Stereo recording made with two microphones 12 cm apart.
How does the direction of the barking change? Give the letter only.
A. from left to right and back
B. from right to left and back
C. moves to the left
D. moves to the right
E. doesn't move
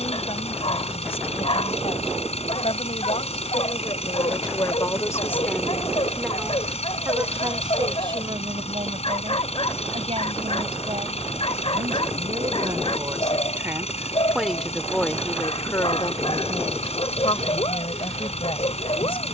E.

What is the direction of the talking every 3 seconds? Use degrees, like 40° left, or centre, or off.
60° left, 40° left, 40° right, 50° right, 20° right, 40° left, 50° left.